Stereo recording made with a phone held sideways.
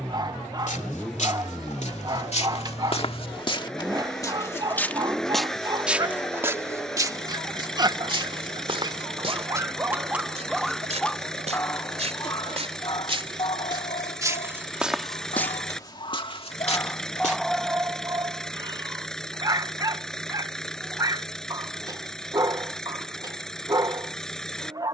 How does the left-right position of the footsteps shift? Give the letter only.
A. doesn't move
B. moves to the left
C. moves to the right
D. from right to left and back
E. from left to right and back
E.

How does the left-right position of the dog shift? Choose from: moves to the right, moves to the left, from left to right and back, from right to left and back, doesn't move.
from right to left and back.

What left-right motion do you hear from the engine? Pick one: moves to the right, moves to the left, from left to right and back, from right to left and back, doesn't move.
doesn't move.